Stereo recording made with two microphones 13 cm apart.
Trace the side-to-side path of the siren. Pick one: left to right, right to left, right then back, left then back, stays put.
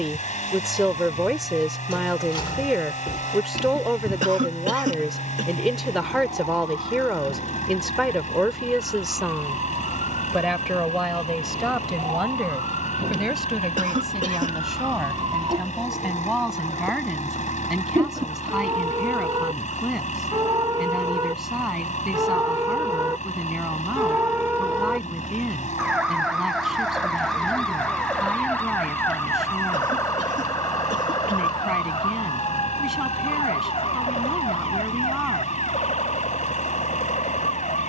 right to left.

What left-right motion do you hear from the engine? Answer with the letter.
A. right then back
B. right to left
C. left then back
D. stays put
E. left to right
D.